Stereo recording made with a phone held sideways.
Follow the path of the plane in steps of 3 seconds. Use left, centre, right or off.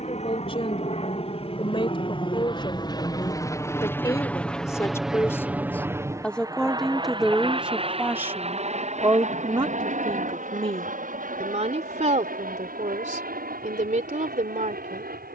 left, centre, right, right, right.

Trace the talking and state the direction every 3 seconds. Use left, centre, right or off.
left, left, centre, right, right.